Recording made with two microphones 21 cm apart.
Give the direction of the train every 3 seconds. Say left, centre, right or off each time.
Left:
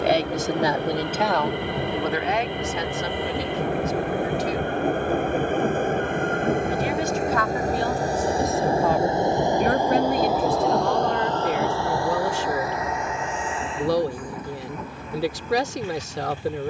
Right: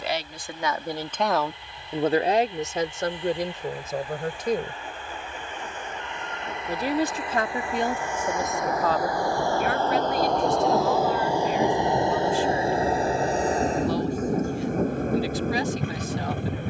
left, left, left, centre, right, right.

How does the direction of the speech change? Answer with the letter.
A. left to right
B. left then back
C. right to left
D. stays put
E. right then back
E.